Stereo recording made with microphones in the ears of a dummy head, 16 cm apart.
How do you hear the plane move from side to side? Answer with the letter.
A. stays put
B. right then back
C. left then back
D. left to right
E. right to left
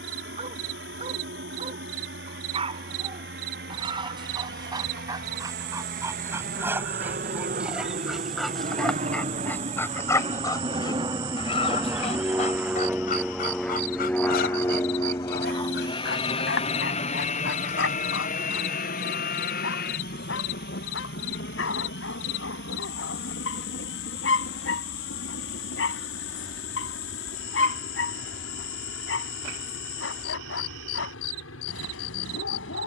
E.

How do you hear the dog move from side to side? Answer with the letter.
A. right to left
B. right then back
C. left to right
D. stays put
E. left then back
A.